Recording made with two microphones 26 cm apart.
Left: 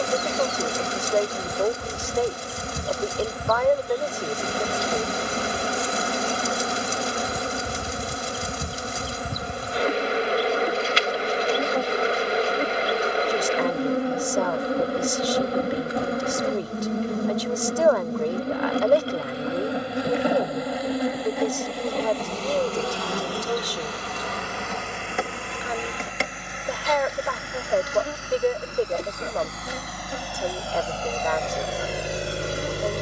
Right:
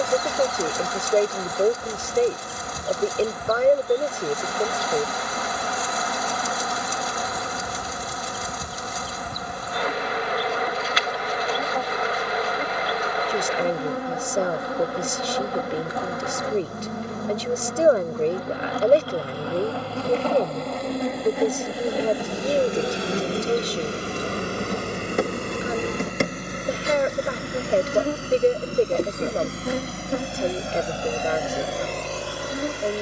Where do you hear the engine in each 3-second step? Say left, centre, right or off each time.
right, right, right, right, right, right, right, right, right, right, centre.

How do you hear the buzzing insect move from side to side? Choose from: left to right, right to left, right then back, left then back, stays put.
left to right.